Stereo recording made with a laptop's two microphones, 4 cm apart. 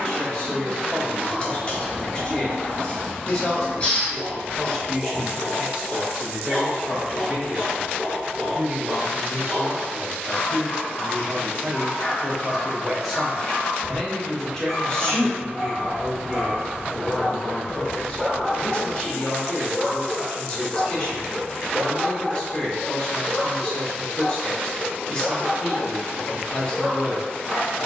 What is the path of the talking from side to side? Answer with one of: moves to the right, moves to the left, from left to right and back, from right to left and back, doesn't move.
from left to right and back.